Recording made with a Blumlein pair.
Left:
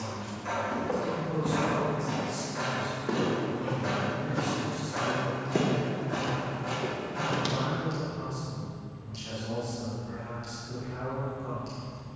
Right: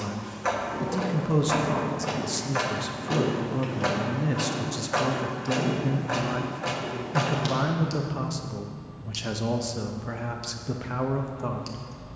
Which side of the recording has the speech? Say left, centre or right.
right.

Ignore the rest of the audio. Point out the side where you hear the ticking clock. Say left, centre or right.
right.